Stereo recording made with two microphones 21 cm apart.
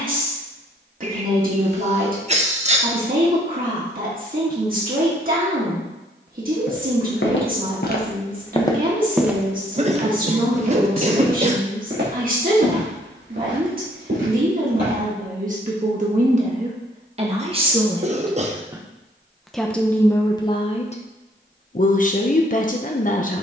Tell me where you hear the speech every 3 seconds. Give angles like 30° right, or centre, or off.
40° right, 40° right, 40° right, 40° right, 40° right, 30° right, 10° left, 40° left.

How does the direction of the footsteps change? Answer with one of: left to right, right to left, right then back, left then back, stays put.
left to right.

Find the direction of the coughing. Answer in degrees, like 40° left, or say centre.
30° right.